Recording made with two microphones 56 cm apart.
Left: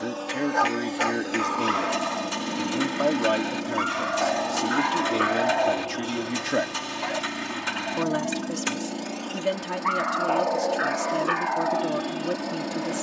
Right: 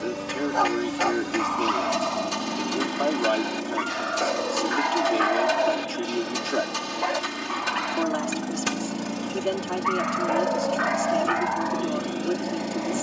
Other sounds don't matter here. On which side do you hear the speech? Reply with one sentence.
In this clip you hear the speech on the left.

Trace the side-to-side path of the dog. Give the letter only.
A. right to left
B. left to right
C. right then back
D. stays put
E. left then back
C.